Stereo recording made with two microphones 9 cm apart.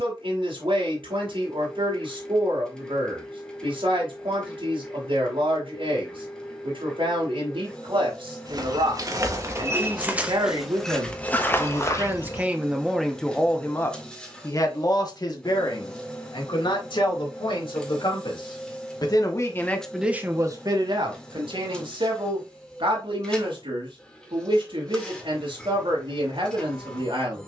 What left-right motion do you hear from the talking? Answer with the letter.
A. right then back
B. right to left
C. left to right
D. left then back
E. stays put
D.